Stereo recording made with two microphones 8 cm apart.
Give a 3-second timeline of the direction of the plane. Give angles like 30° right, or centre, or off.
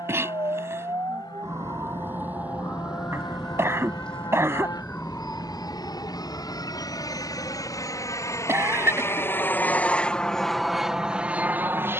70° left, 70° left, 50° left, centre.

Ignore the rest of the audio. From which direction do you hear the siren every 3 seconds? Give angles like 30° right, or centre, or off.
30° right, 10° left, 40° left, 50° left.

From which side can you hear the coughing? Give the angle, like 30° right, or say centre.
30° right.